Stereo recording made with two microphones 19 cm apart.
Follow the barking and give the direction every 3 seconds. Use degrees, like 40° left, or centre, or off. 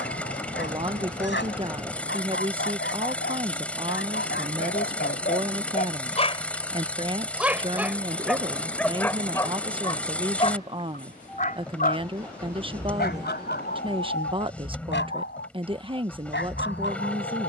70° left, 60° left, 10° left, 30° left, 60° left, 70° left.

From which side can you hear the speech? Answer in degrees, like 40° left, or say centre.
30° right.